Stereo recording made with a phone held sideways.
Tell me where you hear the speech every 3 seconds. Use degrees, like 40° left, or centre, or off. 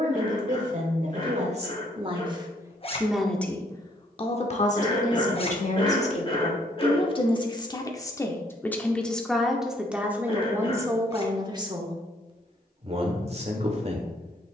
40° right, 40° left, 30° left, 10° right, 40° right.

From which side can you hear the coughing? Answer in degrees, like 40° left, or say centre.
30° left.